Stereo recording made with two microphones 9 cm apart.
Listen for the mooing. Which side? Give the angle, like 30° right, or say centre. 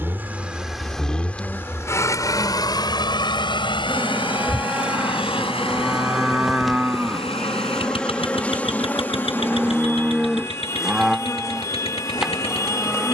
10° right.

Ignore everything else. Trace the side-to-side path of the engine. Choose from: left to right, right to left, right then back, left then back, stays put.
right to left.